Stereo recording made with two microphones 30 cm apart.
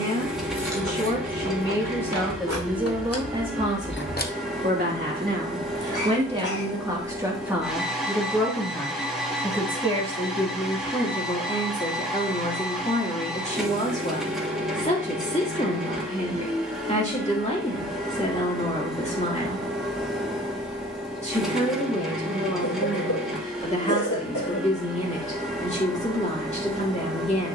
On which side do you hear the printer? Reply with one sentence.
You can hear the printer in the centre.